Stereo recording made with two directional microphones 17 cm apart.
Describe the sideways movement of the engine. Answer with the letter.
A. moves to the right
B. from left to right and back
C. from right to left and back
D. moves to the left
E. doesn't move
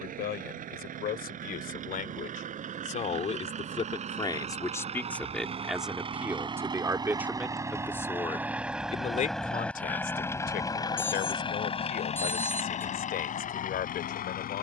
D.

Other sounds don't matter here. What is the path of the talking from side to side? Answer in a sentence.
You can hear the talking move from left to right and back again.